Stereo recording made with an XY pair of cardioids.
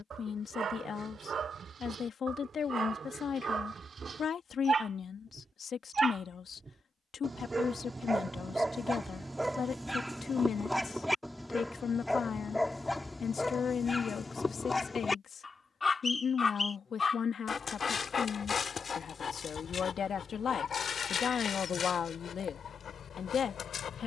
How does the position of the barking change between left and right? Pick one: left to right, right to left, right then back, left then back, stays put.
right to left.